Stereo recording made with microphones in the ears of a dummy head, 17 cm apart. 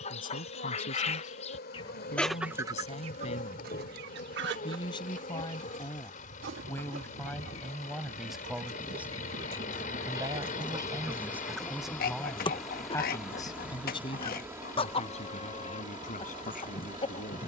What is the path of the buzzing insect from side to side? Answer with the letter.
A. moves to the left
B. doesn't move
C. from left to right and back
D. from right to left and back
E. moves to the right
E.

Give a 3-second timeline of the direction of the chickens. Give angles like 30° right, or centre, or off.
20° left, 60° right, 60° right, 20° right, 30° left, 30° left.